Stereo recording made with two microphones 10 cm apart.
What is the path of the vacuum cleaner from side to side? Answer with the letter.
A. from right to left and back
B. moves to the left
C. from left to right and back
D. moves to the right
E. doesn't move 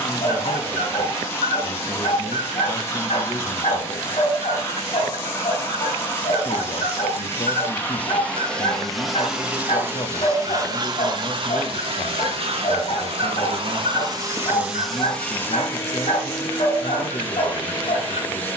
C.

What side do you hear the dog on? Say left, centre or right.
left.